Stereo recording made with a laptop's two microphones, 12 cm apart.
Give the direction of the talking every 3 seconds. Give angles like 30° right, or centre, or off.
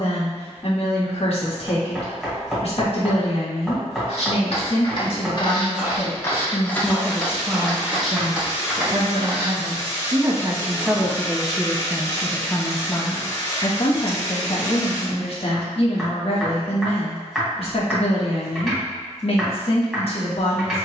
60° left, 50° left, 10° right, 20° right, 30° left, 50° left, 50° left.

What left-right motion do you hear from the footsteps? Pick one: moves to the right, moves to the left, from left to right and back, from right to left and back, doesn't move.
moves to the right.